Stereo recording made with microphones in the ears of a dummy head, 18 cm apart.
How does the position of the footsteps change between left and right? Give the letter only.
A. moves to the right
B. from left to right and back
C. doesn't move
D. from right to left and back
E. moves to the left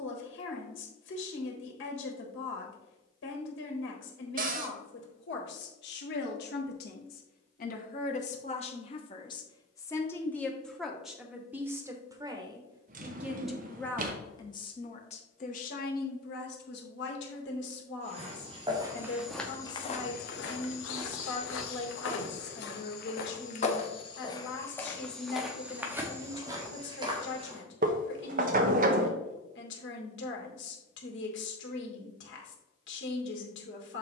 D.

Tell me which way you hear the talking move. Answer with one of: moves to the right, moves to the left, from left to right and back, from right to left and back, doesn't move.
from left to right and back.